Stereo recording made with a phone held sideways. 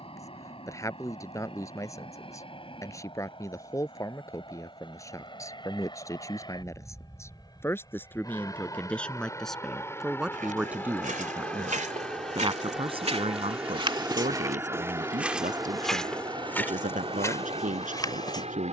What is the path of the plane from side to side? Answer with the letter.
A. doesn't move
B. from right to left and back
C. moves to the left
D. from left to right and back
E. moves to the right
E.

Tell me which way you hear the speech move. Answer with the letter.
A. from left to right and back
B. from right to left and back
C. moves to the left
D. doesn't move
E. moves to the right
E.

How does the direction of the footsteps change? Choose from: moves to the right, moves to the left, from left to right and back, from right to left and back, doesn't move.
moves to the left.